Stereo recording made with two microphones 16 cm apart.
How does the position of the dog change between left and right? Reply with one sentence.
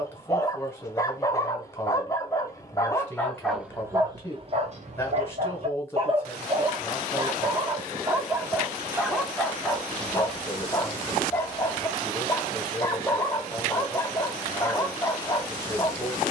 You can hear the dog go right and come back.